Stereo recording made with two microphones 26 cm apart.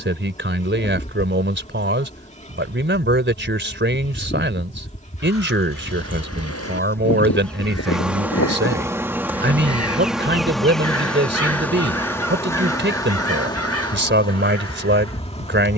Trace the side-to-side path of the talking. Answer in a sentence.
In this clip you hear the talking stay put.